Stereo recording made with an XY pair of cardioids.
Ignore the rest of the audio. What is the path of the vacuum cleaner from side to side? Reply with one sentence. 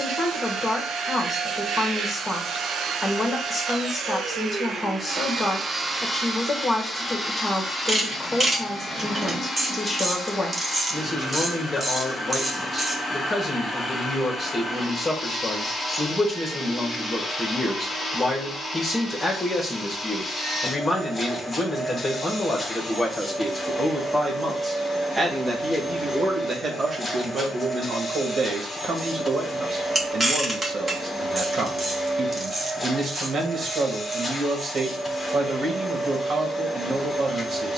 In this clip you hear the vacuum cleaner move to the left.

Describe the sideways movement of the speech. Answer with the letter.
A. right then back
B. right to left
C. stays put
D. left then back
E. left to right
E.